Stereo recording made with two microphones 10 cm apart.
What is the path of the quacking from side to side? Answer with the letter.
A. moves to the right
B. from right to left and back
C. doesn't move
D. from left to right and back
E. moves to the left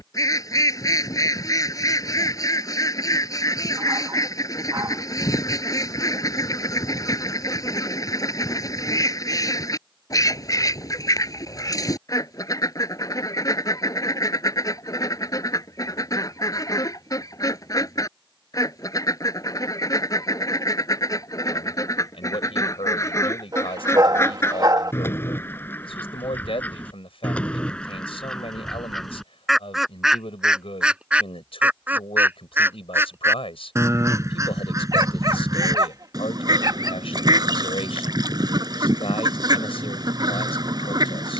A.